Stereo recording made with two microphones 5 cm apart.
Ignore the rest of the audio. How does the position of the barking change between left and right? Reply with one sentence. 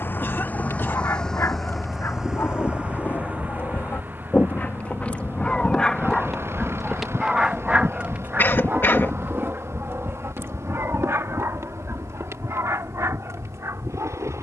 In this clip you hear the barking go from the left side to the right.